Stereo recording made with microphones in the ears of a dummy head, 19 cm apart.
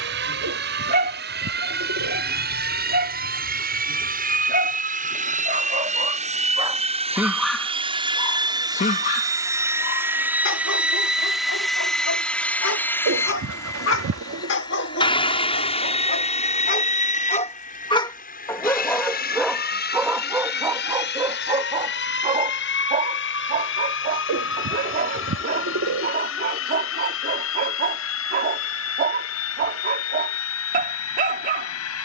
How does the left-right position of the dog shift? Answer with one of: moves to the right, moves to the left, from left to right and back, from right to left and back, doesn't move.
from right to left and back.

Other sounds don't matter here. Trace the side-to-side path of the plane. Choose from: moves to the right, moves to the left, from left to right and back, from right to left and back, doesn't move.
moves to the left.